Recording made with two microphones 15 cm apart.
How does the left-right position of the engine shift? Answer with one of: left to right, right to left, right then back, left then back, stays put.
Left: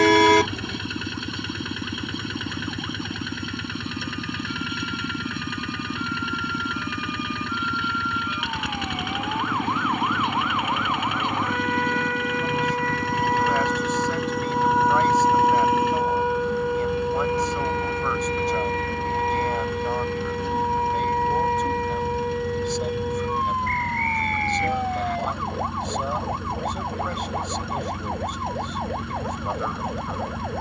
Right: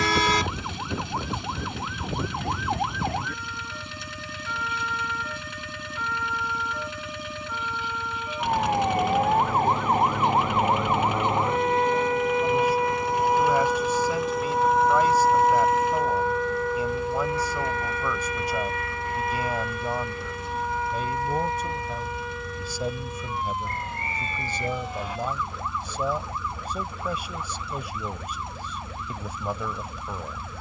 stays put.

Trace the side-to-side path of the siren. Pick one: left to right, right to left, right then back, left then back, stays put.
right to left.